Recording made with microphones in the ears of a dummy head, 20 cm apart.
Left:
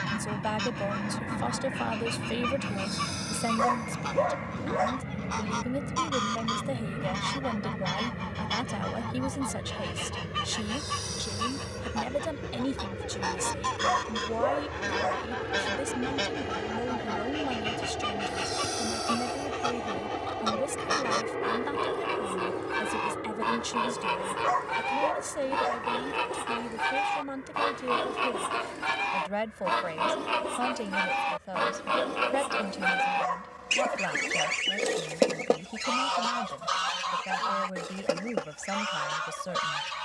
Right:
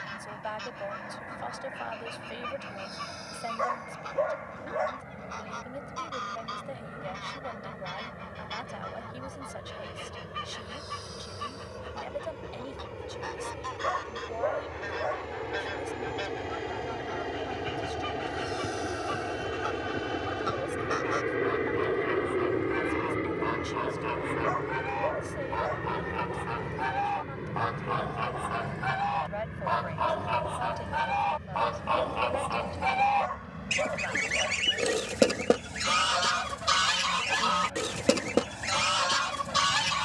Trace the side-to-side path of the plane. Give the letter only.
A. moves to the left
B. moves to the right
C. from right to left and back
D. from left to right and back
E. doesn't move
B.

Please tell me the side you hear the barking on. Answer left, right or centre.
left.